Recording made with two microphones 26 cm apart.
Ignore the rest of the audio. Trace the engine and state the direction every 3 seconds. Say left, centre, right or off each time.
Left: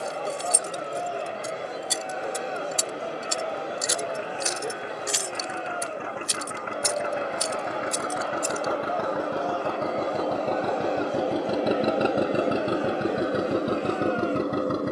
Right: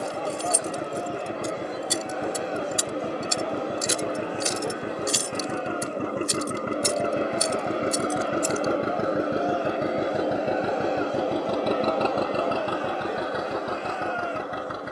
right, right, right, centre, left.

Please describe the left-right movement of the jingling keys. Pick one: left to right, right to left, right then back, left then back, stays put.
right then back.